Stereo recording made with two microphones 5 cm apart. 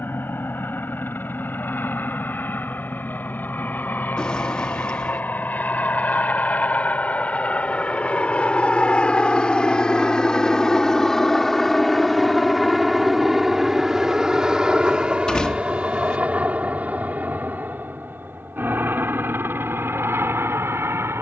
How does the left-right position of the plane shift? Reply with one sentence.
You can hear the plane go from the left side to the right.